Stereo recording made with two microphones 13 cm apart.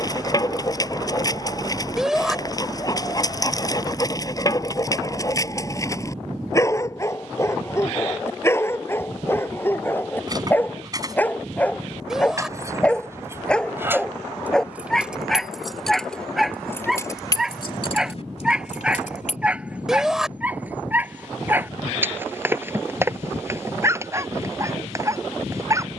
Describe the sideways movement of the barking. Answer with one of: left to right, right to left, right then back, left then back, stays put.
left to right.